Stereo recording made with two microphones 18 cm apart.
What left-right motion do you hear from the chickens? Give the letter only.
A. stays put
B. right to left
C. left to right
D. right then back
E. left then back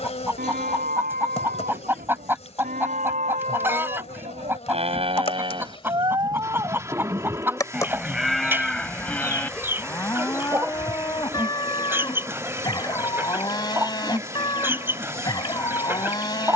A.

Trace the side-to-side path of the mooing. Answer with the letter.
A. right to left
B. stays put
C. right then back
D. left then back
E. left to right
A.